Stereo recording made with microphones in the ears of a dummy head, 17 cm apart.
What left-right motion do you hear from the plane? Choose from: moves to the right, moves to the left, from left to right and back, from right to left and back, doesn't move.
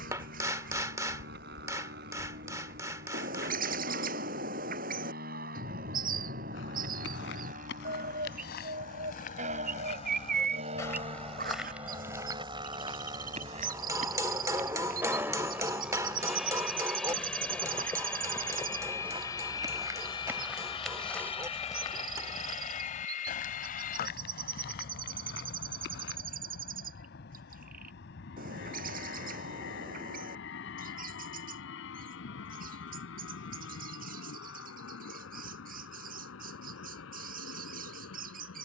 moves to the left.